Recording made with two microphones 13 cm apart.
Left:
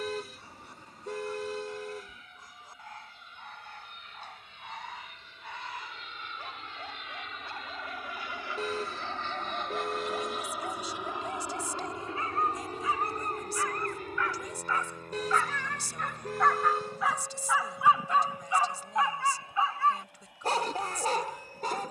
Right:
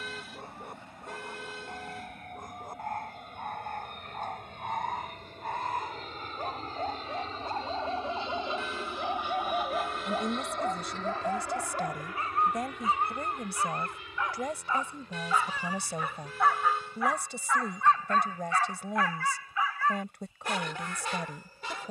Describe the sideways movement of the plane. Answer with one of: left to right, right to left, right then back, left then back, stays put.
right to left.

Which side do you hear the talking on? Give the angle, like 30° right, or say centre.
60° right.